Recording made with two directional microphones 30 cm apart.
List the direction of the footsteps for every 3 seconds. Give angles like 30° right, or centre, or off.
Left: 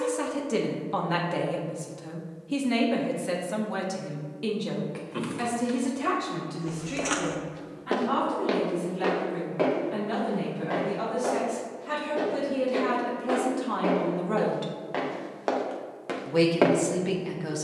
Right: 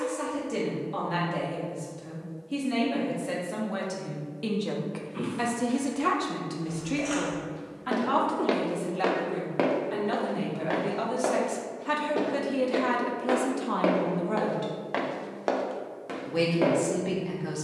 off, off, 30° left, 40° right, 50° right, 10° left.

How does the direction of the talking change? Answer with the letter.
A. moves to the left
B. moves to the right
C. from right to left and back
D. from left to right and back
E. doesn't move
D.